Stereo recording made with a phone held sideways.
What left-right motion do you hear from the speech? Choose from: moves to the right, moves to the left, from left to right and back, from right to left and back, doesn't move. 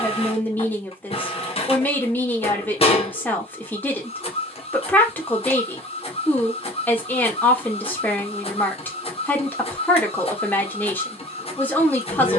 doesn't move.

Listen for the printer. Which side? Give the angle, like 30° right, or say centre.
40° left.